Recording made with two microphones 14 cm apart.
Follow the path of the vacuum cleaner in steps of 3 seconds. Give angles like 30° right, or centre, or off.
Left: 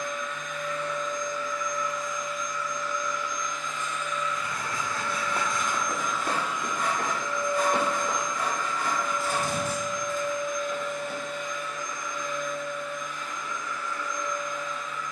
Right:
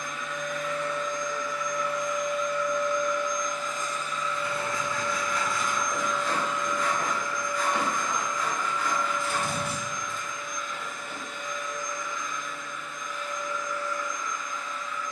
70° right, 30° right, 20° left, 50° left, 50° left.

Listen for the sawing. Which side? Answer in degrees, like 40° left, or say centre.
60° left.